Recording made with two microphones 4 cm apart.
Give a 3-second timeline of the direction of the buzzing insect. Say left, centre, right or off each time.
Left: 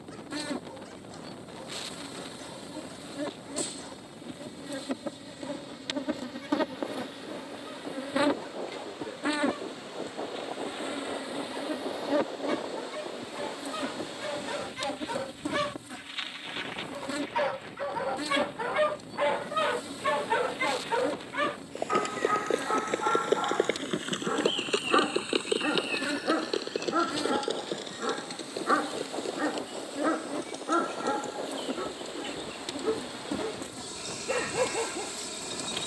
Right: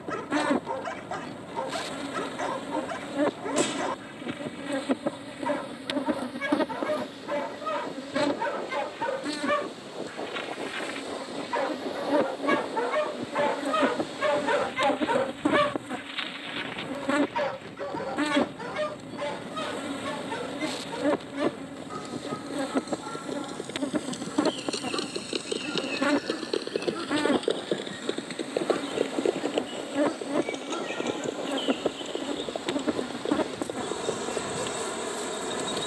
right, right, centre, left, right, right, right, right, right, right, right, right.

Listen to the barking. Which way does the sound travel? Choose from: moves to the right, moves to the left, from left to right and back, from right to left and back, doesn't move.
moves to the left.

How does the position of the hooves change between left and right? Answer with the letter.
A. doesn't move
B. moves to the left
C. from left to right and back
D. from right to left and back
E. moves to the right
E.